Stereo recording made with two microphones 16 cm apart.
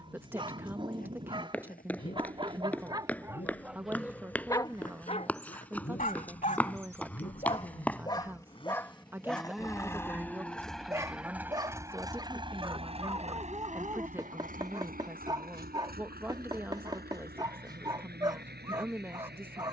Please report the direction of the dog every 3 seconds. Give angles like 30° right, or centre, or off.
30° right, 10° left, 30° left, 10° right, 30° right, 30° right, 30° right.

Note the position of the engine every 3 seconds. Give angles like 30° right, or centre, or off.
60° left, 50° left, 40° left, centre, 40° right, 70° right, 80° right.